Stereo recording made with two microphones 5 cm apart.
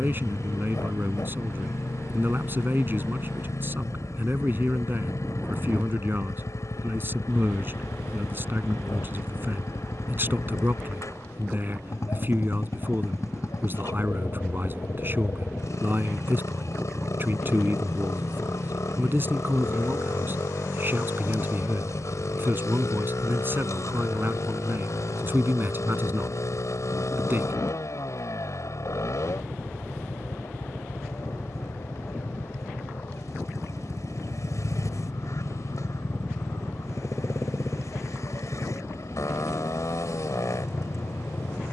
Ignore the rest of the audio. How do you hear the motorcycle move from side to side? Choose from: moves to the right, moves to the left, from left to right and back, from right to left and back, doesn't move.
doesn't move.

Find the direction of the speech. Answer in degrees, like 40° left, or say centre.
40° right.